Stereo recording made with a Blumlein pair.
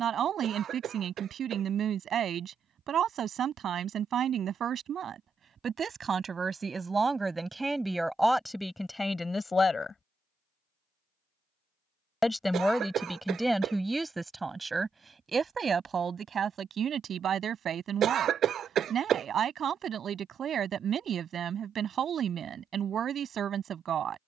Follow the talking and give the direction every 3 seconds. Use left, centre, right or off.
right, right, centre, centre, centre, right, right, right.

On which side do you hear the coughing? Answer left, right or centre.
right.